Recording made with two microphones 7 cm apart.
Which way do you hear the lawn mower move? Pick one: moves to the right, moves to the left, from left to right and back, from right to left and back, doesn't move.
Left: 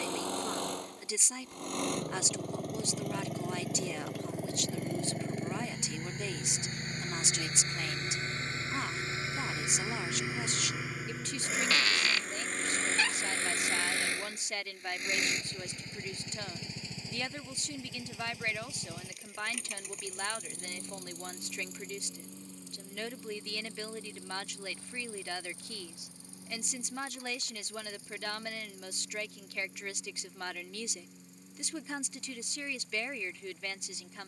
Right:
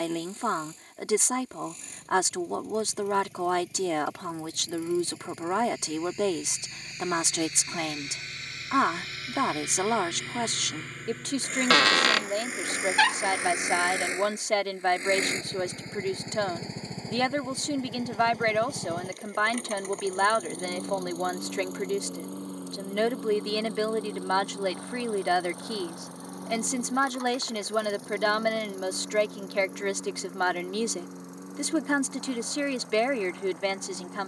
moves to the right.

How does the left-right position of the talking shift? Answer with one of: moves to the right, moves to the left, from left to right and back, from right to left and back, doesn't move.
doesn't move.